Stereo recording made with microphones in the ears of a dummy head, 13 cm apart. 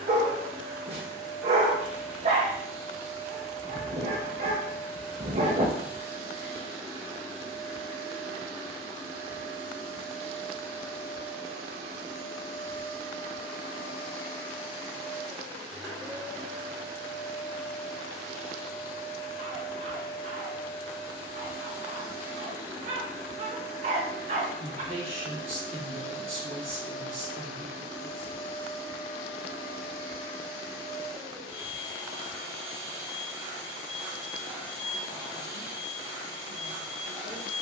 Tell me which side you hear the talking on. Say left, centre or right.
right.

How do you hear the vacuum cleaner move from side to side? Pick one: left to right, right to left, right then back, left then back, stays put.
stays put.